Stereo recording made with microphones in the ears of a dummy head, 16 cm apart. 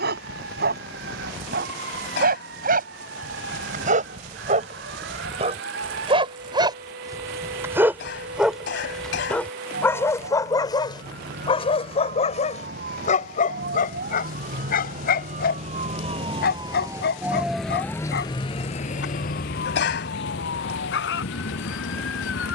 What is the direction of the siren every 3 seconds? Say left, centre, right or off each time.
right, right, right, right, right, right, left, left.